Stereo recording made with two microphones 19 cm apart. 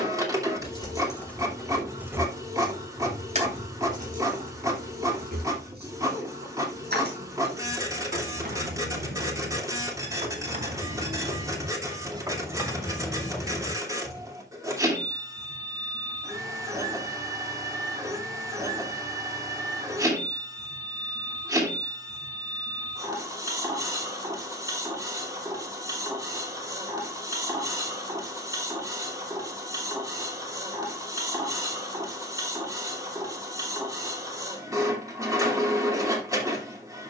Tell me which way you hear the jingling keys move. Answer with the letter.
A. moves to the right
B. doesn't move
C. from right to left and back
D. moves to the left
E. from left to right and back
E.